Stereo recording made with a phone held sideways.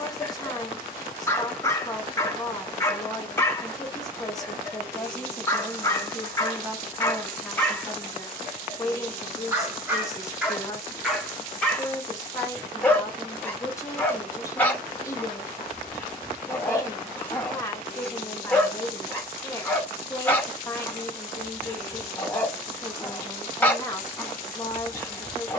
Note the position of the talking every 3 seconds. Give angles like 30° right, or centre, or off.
20° left, 10° left, centre, 20° left, 20° left, 20° left, 20° left, 20° left, 20° left.